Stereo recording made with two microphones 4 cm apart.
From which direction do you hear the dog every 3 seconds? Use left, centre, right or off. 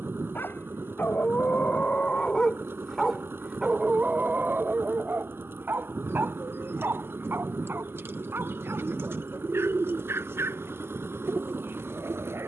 left, right, right, right.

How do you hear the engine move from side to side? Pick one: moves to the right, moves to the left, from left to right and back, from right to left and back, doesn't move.
doesn't move.